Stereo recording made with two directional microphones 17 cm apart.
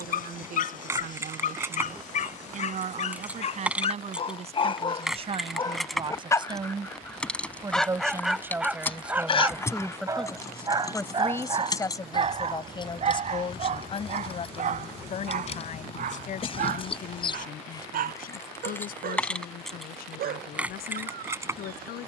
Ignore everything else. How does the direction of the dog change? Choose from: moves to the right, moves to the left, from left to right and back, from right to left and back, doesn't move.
moves to the right.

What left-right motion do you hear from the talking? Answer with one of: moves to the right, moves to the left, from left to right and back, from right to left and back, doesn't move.
moves to the left.